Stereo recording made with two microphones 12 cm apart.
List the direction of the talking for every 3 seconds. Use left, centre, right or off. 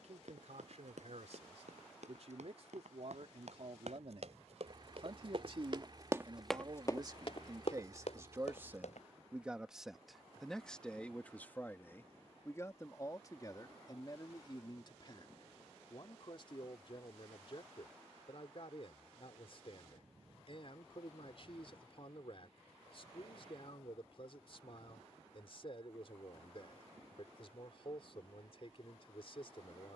right, right, right, centre, left, left, left, left, left, left.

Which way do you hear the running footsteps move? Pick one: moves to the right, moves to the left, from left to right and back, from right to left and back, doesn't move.
moves to the left.